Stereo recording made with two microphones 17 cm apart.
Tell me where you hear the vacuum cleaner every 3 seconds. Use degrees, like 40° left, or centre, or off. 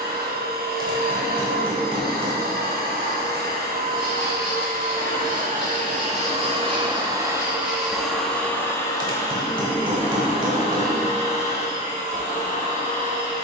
60° right, 60° right, 10° right, 30° left, 40° left.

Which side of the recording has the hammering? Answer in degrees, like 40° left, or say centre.
30° right.